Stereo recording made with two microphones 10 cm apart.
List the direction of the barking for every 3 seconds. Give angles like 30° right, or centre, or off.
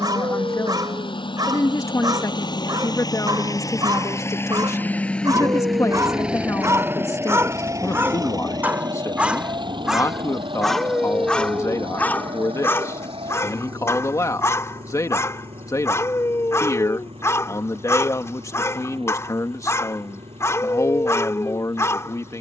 40° right, 40° right, 30° right, centre, 30° left, 30° left, 30° left, 30° left.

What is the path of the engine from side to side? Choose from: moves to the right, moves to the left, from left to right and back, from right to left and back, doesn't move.
moves to the right.